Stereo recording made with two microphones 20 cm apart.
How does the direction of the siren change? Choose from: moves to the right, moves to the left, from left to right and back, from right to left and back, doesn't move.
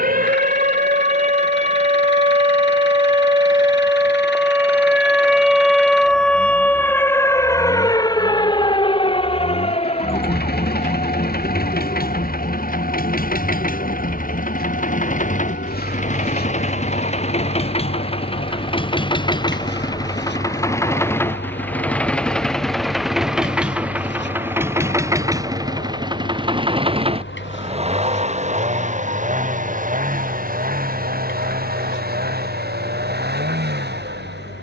moves to the left.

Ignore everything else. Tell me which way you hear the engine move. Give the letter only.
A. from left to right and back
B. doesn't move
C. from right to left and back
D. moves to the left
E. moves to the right
E.